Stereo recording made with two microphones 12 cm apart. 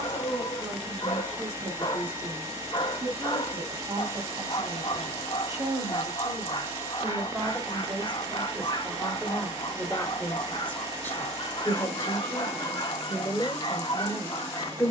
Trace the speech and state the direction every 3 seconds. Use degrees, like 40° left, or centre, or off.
40° right, 30° right, 20° right, 10° left, 20° left.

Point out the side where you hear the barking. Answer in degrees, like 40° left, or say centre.
40° left.